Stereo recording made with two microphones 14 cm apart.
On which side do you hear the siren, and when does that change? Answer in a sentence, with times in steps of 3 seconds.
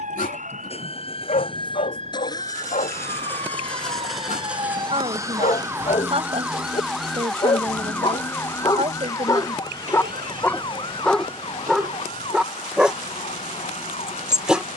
You can hear the siren on the right from 0 s, in the centre from 6 s and on the left from 9 s.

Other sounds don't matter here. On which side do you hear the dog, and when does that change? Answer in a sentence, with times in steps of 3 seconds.
In this clip you hear the dog on the left from 0 s and in the centre from 9 s.